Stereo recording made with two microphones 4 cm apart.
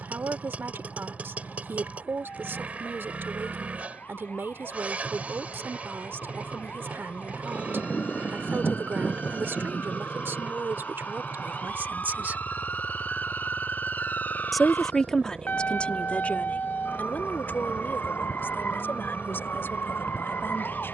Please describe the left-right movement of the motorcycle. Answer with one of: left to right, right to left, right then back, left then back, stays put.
stays put.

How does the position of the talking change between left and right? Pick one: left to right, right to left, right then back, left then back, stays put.
right to left.